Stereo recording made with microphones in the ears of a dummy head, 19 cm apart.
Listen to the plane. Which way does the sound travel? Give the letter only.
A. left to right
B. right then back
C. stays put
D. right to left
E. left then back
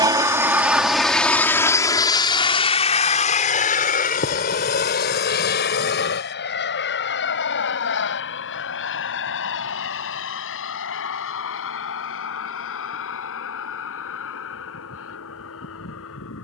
D.